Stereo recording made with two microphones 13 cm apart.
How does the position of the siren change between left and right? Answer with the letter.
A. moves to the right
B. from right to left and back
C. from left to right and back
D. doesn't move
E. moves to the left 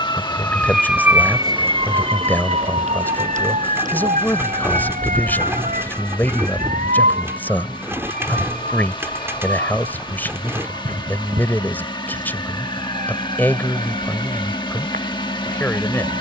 A.